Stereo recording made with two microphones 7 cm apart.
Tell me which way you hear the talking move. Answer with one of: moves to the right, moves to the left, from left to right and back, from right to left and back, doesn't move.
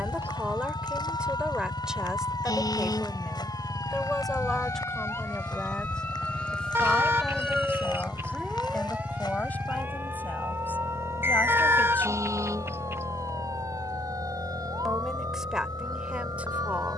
from right to left and back.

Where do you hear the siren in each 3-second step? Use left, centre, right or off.
left, left, centre, right, right, right.